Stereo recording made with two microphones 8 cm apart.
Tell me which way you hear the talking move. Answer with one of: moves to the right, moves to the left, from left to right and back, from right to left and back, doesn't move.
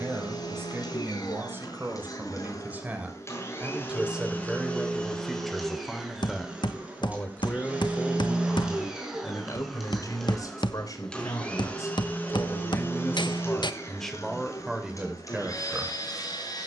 from right to left and back.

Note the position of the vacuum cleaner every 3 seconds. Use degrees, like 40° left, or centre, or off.
50° left, 20° left, 20° right, centre, 30° left, 50° left.